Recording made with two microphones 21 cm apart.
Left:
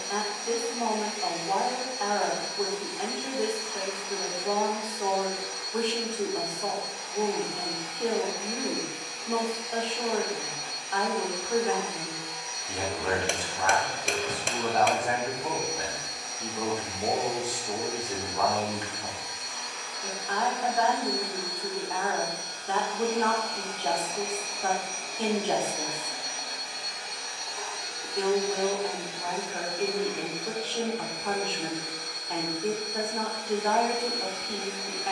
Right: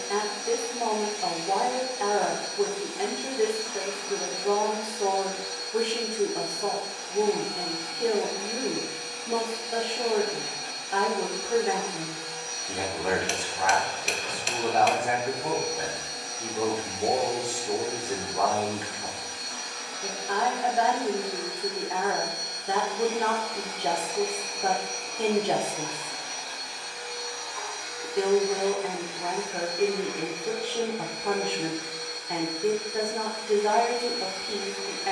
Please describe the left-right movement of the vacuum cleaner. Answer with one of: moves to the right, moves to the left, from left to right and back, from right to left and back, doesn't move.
moves to the left.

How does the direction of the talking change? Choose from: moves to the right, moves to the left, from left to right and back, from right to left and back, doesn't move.
doesn't move.